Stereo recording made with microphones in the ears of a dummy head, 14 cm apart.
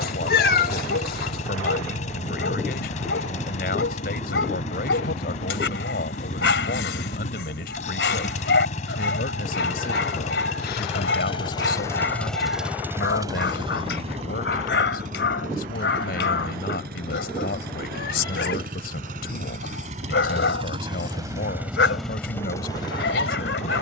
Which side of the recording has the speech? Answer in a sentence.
In this clip you hear the speech on the left.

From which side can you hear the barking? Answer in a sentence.
In this clip you hear the barking on the left.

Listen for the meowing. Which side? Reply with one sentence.
You can hear the meowing on the left.